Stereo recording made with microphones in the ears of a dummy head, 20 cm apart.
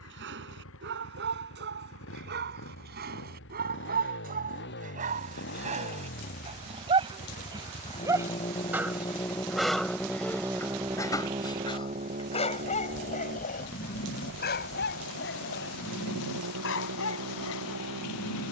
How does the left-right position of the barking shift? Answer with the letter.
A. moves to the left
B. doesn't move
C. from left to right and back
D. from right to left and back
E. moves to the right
A.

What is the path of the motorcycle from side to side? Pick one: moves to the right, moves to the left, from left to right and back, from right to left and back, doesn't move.
moves to the right.